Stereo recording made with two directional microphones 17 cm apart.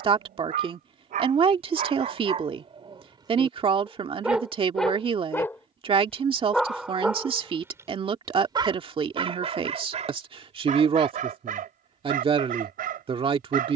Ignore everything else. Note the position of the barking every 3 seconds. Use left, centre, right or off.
right, centre, centre, right, right.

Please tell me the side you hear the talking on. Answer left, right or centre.
right.